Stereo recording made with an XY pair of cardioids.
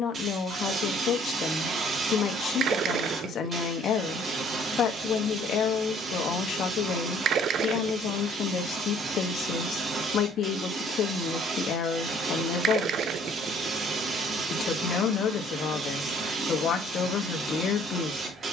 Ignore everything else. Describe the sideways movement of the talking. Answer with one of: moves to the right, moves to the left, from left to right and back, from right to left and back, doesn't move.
doesn't move.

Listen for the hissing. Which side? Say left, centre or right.
right.